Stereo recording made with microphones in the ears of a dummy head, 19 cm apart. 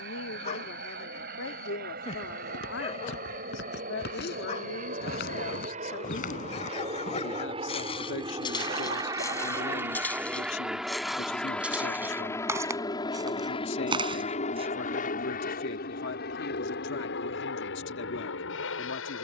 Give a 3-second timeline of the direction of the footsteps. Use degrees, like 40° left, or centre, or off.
60° left, 50° left, 30° left, centre, 20° right, off, off.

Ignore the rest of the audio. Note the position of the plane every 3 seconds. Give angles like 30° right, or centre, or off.
50° right, 40° right, 30° right, centre, 20° left, 50° left, 60° left.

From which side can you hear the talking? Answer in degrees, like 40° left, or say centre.
60° left.